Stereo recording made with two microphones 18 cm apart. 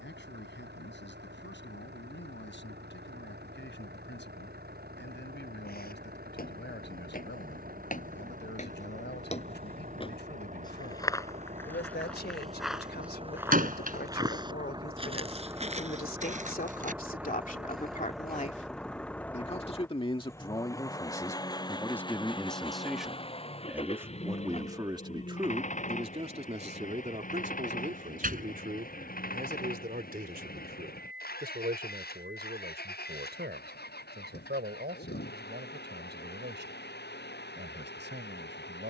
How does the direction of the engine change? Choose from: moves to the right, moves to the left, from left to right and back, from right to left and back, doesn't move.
moves to the left.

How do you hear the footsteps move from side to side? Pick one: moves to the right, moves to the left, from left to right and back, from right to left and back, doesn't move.
moves to the right.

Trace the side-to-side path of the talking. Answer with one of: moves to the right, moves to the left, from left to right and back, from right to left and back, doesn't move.
moves to the right.